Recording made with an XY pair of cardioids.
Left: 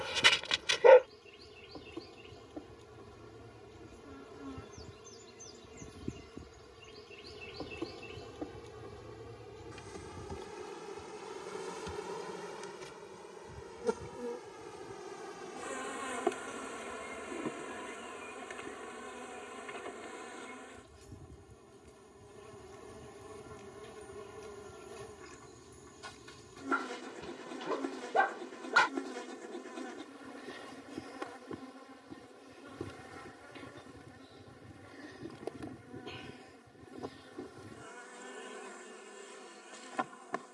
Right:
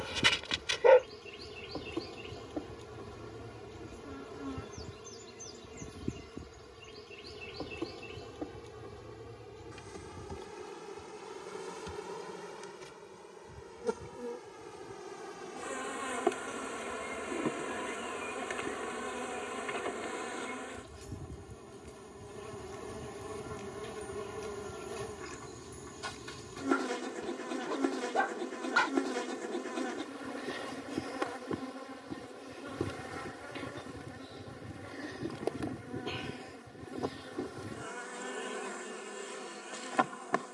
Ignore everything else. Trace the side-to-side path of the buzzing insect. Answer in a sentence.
You can hear the buzzing insect move from right to left and back again.